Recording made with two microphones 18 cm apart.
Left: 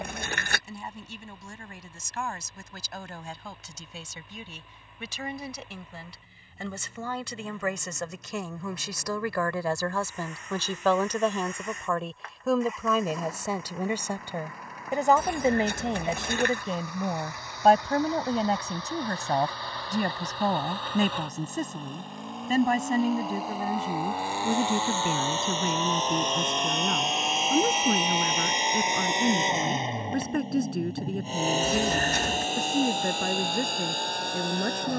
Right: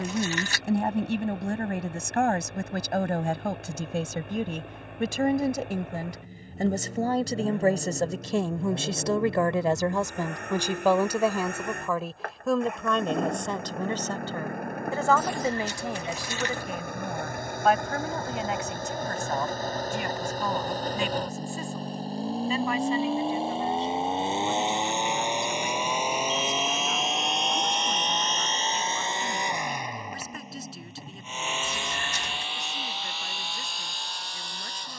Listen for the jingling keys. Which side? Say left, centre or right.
left.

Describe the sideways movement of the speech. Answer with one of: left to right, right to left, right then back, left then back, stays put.
right to left.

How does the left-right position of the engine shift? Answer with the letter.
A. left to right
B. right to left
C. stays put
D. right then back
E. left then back
B.